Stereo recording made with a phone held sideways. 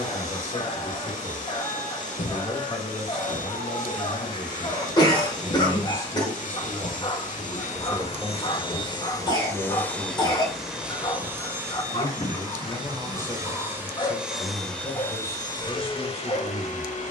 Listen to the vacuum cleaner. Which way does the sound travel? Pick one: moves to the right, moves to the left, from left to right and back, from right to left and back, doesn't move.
from left to right and back.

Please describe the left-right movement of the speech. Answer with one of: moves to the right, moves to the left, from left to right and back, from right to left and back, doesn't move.
from left to right and back.